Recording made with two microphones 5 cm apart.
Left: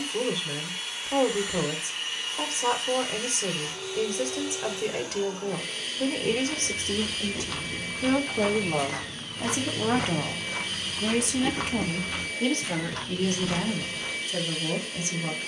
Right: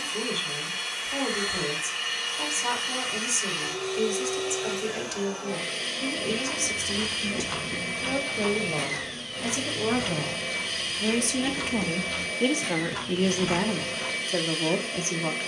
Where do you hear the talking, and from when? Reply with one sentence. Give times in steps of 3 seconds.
In this clip you hear the talking on the left from 0 s, in the centre from 9 s and on the right from 12 s.